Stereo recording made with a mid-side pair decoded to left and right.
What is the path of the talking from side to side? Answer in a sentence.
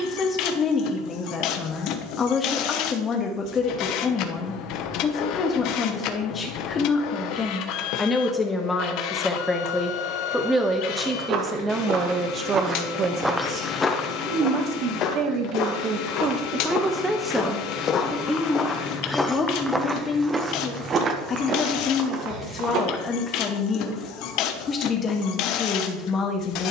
In this clip you hear the talking go right and come back.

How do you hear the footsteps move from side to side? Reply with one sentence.
In this clip you hear the footsteps go left and come back.